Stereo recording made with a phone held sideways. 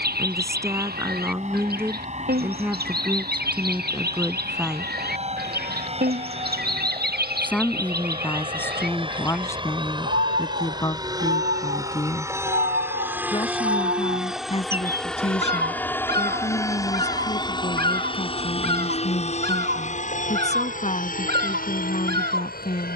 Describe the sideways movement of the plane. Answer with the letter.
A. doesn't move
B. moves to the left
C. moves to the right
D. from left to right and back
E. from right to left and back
B.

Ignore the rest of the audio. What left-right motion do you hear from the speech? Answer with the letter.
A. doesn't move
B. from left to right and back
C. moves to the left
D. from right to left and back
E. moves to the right
C.